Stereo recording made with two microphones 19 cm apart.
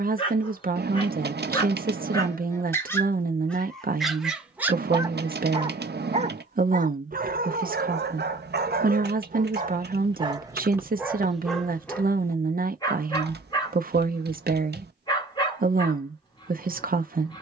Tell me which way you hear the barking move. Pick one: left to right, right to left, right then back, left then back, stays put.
right then back.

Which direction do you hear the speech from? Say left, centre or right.
right.